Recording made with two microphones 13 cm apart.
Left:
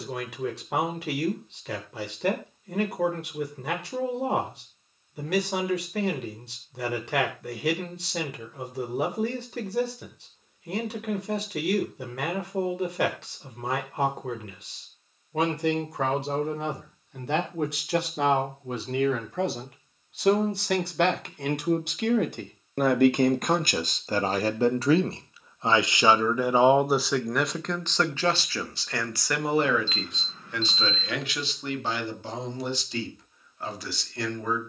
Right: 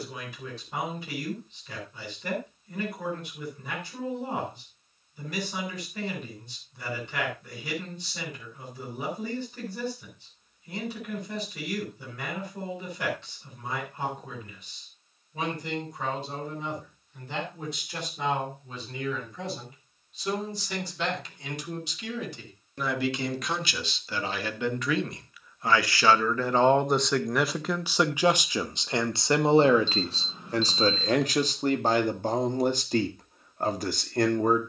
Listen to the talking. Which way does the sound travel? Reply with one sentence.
You can hear the talking move from left to right.